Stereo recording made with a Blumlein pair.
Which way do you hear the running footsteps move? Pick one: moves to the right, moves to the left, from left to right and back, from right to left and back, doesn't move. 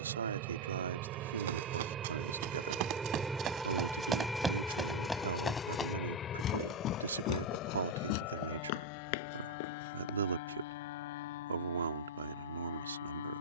moves to the left.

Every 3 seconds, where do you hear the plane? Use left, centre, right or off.
right, centre, left, left, left.